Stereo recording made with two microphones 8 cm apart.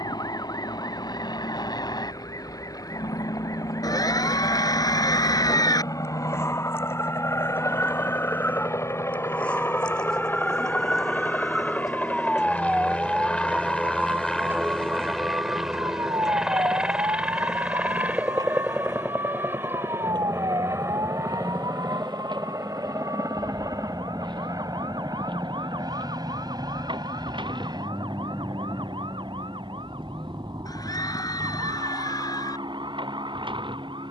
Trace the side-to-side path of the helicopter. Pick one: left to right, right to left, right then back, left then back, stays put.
left to right.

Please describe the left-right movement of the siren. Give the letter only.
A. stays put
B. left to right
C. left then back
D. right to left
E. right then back
B.